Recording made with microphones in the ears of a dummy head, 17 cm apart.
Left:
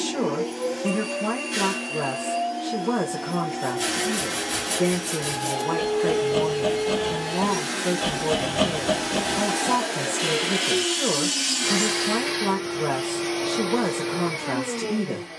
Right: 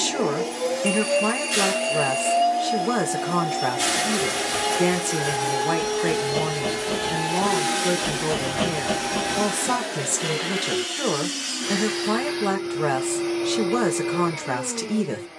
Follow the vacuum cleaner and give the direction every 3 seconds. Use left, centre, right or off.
right, right, right, left, left.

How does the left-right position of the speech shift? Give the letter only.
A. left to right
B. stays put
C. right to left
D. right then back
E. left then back
B.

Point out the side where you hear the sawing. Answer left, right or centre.
left.